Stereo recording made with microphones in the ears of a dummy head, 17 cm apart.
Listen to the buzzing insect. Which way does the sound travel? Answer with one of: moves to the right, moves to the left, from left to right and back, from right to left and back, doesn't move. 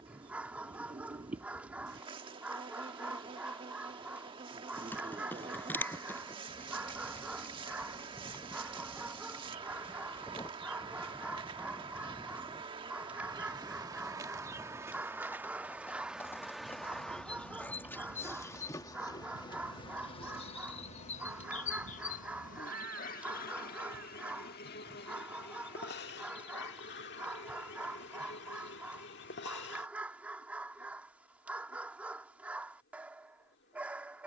moves to the left.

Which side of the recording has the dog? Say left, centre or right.
centre.